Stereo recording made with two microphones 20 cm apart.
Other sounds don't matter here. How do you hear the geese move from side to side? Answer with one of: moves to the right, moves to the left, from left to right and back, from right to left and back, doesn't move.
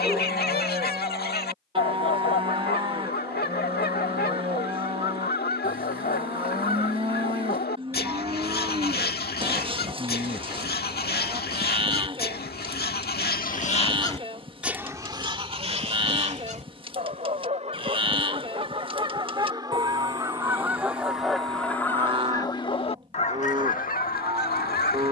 from left to right and back.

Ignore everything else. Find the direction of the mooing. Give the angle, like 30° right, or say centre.
30° right.